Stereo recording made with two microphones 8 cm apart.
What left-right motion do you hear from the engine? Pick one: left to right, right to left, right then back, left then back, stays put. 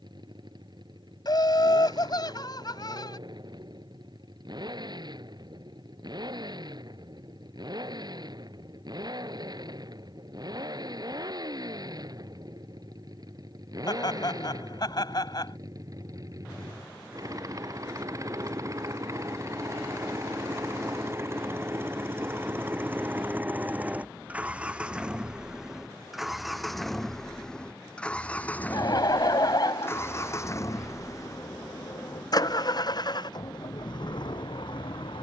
right to left.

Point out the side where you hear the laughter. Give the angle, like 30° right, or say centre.
50° left.